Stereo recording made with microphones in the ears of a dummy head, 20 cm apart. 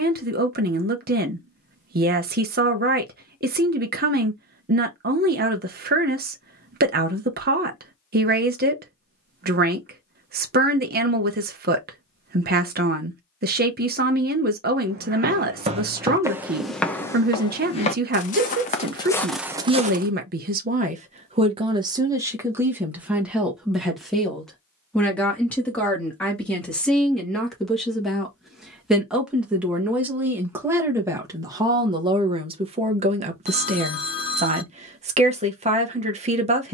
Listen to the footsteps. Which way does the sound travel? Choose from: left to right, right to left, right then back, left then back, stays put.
left then back.